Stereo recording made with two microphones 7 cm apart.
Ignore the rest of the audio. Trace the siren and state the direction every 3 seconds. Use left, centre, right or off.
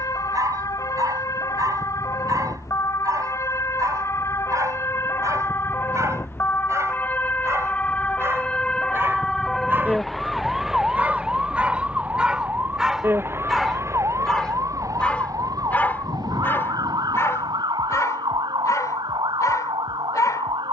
left, left, left, centre, right, right, right.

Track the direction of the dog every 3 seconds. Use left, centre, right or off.
right, right, right, right, centre, left, left.